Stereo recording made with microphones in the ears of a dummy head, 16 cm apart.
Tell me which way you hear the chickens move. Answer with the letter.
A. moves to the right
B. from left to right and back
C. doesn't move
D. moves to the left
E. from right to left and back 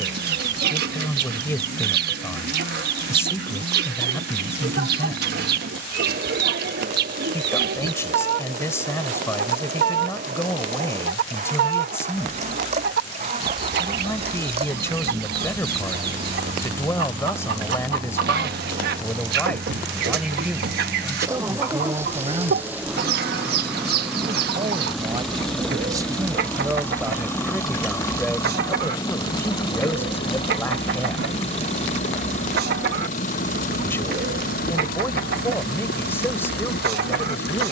C.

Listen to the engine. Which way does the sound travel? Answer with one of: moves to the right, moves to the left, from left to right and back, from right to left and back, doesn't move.
moves to the left.